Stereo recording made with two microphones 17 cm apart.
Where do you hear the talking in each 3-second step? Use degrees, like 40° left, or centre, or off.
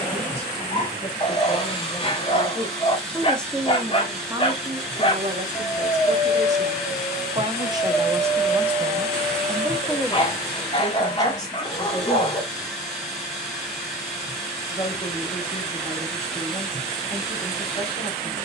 30° left, 20° right, 30° right, 10° left, 30° left, 30° left.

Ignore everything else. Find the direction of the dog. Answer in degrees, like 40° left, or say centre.
30° left.